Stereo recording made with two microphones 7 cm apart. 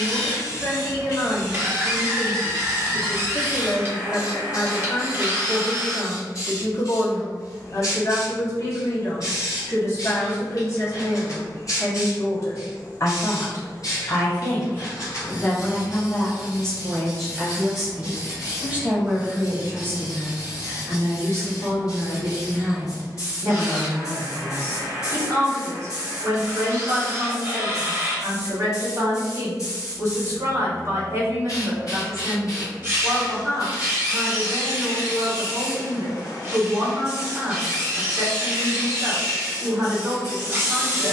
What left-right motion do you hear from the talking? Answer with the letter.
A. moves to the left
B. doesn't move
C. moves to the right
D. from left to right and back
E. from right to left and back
C.